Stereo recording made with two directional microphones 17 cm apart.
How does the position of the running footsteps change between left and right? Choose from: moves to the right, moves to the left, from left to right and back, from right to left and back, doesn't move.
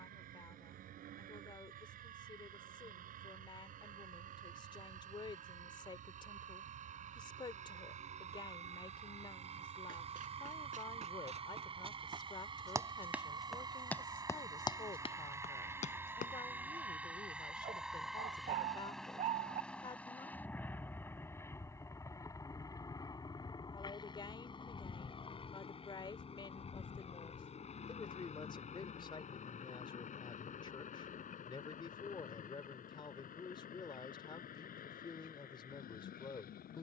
moves to the left.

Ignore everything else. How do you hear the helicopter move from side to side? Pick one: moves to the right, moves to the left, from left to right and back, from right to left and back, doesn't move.
moves to the left.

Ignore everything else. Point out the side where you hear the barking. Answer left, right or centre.
right.